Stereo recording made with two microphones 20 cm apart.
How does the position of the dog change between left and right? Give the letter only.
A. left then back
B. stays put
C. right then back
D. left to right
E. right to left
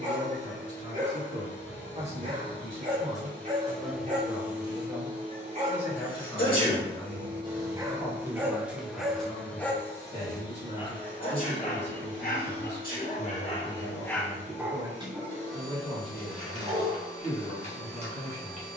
A.